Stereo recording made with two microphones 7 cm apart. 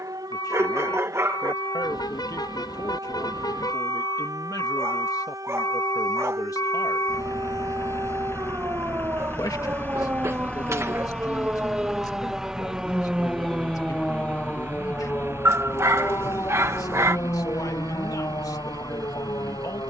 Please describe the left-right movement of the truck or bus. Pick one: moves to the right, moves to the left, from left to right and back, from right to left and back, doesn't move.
moves to the right.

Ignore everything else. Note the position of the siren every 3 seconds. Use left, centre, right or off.
right, right, right, right, centre, left, left.